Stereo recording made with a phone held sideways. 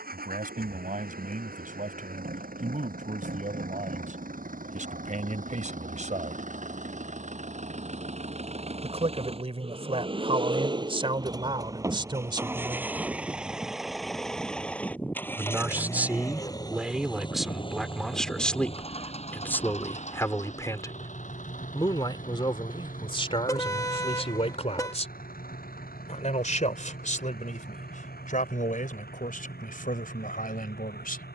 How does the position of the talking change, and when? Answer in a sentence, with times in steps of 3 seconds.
In this clip you hear the talking on the right from 0 s, in the centre from 15 s and on the left from 21 s.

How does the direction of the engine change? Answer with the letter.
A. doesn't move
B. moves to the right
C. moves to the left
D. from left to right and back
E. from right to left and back
C.